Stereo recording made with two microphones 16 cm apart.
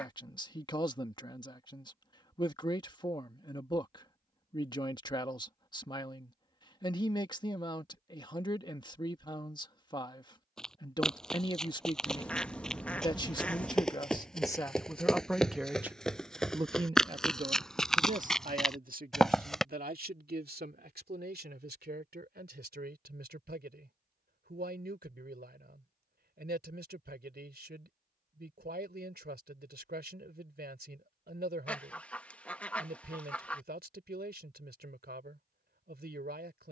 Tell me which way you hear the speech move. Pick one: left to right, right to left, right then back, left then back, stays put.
left to right.